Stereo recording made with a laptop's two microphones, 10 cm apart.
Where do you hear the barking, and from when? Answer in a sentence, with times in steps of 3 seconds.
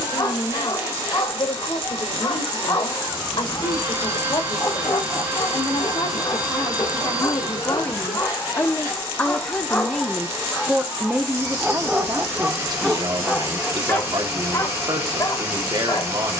You can hear the barking on the left from 0 s, in the centre from 9 s and on the left from 15 s.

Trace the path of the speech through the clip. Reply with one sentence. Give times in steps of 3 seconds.
In this clip you hear the speech on the left from 0 s, in the centre from 9 s and on the right from 12 s.